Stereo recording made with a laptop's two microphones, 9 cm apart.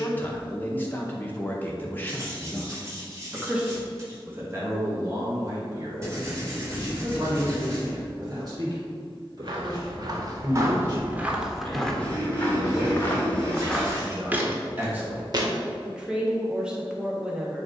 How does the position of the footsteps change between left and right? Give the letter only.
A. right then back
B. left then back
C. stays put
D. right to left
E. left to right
B.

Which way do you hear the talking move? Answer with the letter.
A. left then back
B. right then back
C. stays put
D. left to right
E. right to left
B.